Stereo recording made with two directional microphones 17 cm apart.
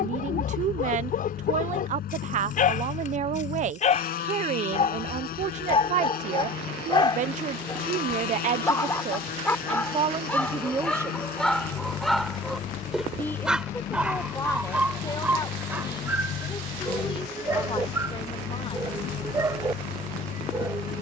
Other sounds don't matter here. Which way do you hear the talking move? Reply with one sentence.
You can hear the talking move from right to left.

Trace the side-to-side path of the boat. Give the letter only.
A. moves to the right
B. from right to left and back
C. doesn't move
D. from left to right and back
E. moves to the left
C.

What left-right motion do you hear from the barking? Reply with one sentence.
In this clip you hear the barking go from the left side to the right.